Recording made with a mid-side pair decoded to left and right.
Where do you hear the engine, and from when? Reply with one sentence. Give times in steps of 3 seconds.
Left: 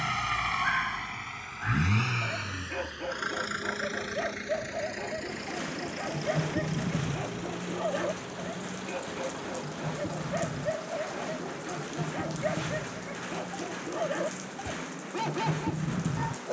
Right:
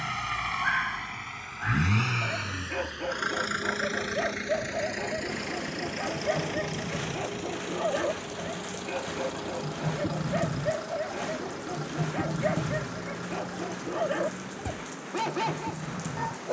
You can hear the engine in the centre from 0 s, on the right from 3 s and not at all from 15 s.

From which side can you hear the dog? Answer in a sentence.
You can hear the dog on the right.